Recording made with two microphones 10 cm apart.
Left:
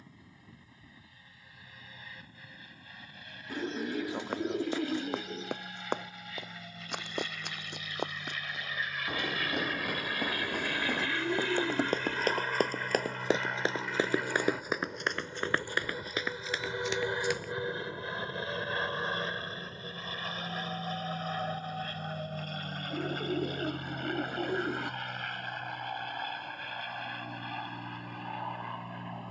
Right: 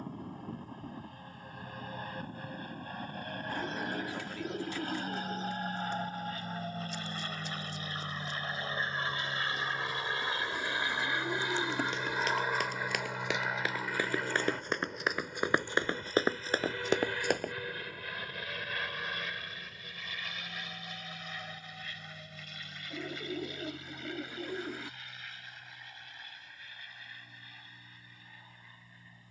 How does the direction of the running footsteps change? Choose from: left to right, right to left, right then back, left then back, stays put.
left to right.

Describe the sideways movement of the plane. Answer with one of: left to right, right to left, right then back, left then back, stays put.
right to left.